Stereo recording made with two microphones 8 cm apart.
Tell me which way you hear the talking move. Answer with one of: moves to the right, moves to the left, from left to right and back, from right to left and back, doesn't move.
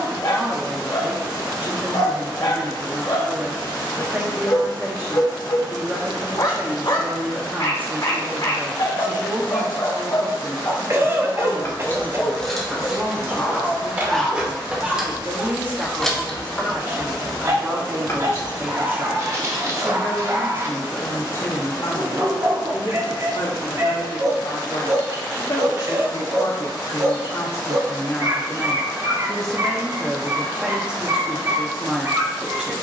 from right to left and back.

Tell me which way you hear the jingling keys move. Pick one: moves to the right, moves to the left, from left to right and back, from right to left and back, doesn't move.
from left to right and back.